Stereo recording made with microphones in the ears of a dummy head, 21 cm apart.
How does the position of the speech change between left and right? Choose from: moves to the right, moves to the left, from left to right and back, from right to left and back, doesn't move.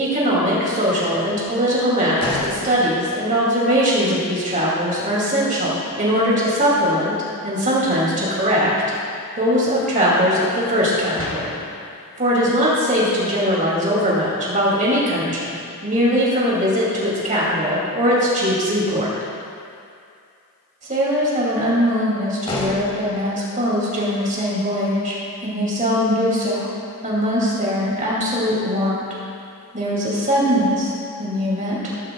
doesn't move.